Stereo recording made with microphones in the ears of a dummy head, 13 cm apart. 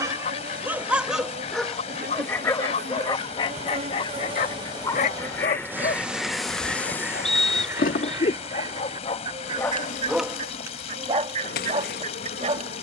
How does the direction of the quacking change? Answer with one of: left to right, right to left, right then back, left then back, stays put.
left to right.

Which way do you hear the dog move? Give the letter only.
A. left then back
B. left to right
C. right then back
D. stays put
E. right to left
A.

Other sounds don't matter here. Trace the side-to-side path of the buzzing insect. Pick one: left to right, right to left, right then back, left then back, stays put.
right to left.